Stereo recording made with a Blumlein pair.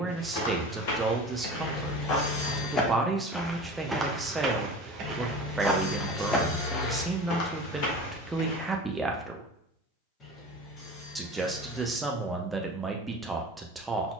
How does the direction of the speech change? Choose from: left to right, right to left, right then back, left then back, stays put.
stays put.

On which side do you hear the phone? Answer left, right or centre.
left.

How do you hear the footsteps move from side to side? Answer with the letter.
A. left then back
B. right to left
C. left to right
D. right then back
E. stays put
D.